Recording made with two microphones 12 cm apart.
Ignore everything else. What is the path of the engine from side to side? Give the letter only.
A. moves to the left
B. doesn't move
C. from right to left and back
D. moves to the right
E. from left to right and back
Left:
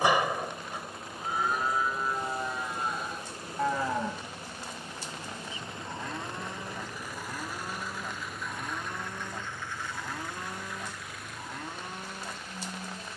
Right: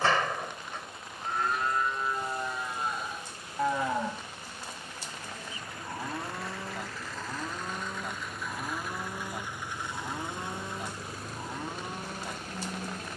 D.